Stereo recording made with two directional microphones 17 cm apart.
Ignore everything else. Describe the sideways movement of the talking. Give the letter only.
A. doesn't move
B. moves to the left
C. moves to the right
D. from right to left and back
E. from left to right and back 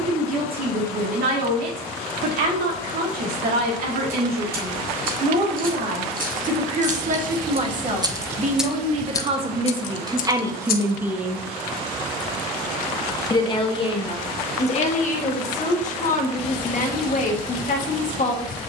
B.